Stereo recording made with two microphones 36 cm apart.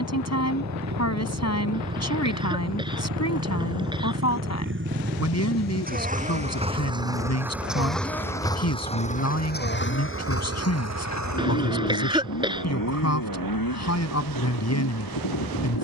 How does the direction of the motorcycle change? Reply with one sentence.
In this clip you hear the motorcycle move from right to left.